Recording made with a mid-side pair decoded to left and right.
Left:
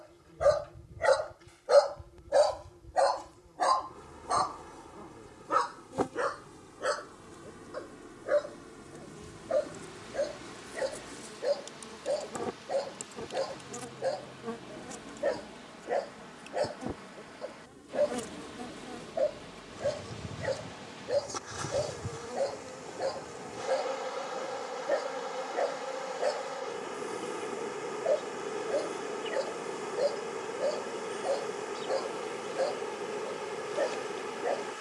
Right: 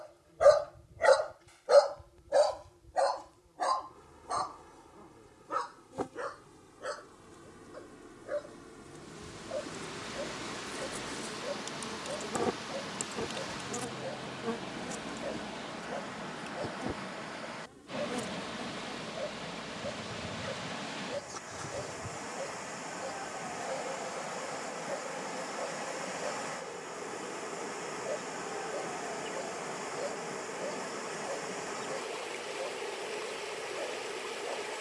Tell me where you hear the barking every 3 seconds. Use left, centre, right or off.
centre, left, left, left, left, left, left, left, left, left, left, left.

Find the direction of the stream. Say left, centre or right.
right.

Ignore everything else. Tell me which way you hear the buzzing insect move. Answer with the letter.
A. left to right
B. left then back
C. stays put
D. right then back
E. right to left
D.